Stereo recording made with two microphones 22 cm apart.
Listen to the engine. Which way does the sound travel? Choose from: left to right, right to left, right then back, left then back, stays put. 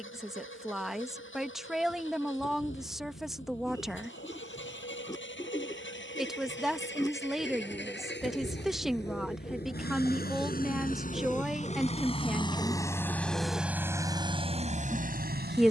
left to right.